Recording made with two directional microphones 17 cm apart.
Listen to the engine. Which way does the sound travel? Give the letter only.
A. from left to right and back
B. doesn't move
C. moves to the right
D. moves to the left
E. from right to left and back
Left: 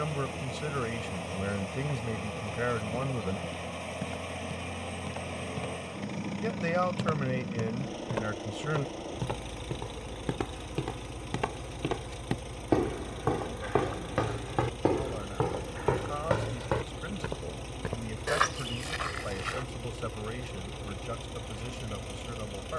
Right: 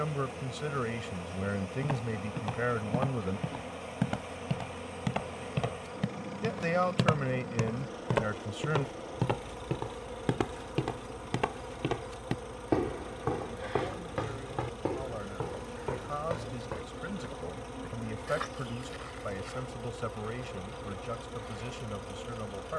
B.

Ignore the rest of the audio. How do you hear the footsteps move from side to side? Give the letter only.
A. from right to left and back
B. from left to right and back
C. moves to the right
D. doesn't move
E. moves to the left
E.